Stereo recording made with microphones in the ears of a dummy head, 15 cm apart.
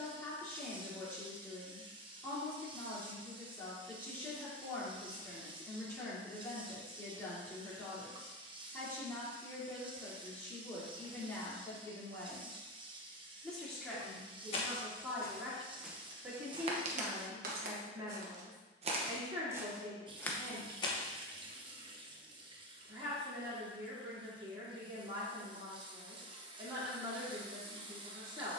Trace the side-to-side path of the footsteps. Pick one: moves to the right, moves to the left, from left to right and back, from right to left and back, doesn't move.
from left to right and back.